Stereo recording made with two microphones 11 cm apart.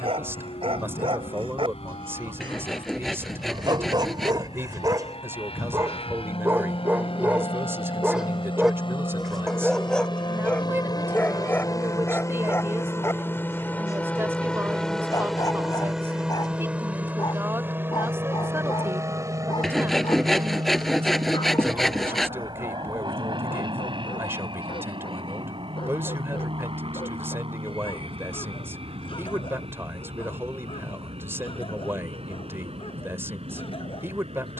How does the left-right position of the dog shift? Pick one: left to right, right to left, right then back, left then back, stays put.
right to left.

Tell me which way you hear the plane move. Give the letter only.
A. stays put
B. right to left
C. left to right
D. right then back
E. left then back
C.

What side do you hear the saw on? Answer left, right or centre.
centre.